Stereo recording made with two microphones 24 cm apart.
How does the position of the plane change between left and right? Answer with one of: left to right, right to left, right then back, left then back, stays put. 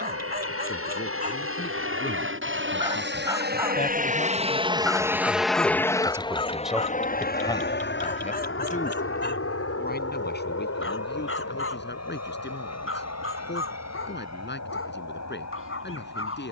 right to left.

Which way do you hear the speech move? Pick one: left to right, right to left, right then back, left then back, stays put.
right then back.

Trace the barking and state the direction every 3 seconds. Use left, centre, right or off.
right, centre, left, left, left, left.